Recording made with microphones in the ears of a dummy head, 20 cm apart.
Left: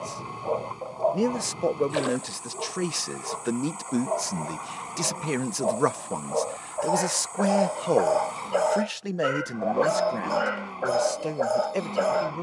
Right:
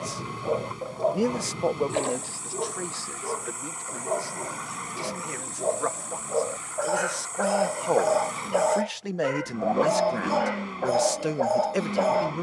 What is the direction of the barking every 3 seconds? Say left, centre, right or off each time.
right, right, centre, centre.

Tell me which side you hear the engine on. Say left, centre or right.
right.